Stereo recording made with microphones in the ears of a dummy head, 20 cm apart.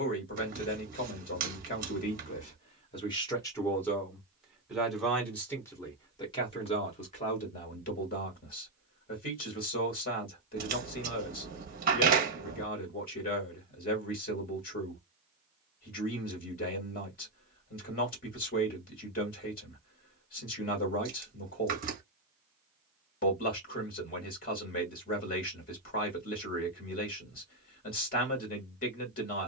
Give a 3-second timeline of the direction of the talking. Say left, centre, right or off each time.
left, centre, left, left, left, left, left, left, left, left.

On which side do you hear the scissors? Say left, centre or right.
right.